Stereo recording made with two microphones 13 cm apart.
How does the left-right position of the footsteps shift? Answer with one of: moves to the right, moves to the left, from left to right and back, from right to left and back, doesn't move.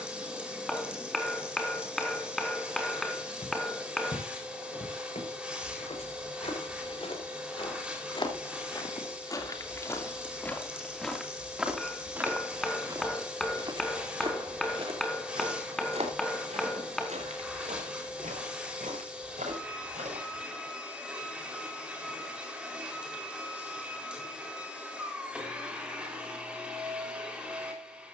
moves to the right.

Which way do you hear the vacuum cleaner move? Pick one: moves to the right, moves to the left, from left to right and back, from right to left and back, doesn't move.
doesn't move.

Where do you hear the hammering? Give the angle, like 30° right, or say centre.
centre.